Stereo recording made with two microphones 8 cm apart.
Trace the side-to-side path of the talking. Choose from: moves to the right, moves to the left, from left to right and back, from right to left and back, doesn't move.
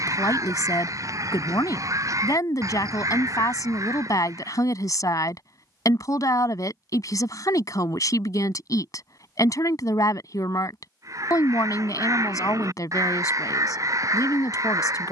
doesn't move.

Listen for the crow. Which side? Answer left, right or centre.
right.